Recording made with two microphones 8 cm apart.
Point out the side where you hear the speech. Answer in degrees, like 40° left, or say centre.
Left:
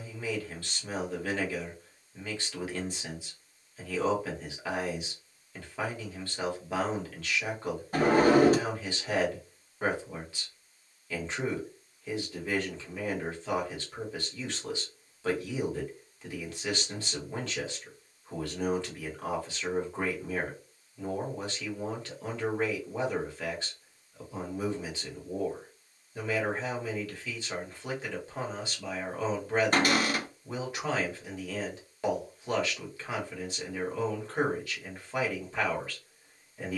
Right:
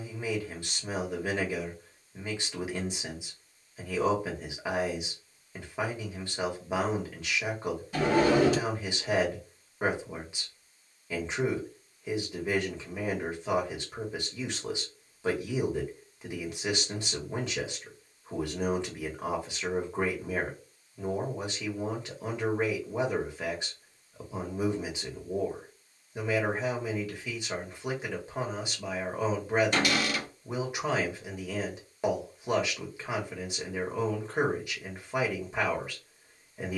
20° right.